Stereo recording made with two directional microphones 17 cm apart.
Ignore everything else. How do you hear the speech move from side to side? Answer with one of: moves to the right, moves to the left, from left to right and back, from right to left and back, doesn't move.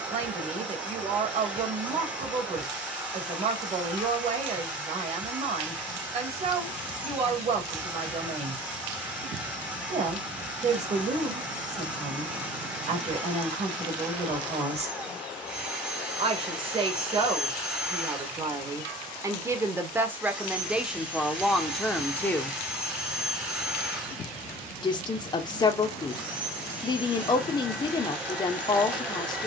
moves to the left.